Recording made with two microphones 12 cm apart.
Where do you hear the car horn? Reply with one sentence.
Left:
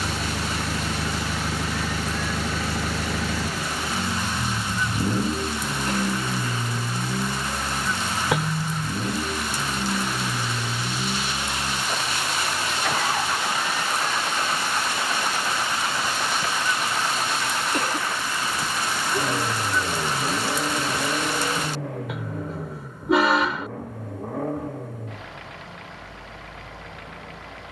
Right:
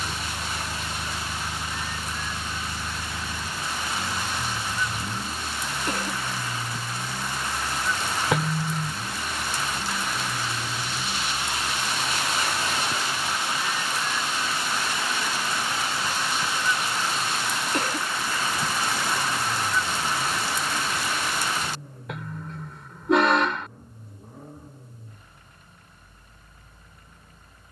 In this clip you hear the car horn in the centre.